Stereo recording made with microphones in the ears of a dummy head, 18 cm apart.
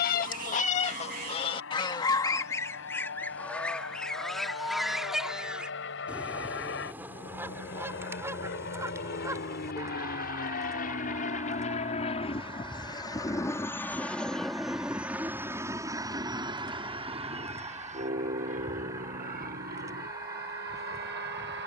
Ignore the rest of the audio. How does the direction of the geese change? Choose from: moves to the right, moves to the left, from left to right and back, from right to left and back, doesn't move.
moves to the right.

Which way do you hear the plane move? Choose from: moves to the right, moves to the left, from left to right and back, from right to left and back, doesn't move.
moves to the right.